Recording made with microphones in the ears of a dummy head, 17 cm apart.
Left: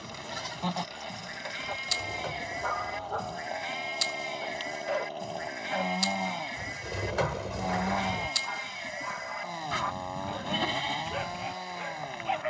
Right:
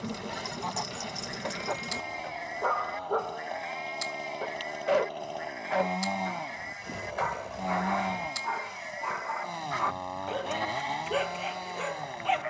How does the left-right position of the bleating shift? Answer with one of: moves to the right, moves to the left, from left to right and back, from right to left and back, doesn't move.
doesn't move.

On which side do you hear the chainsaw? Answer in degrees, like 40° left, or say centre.
centre.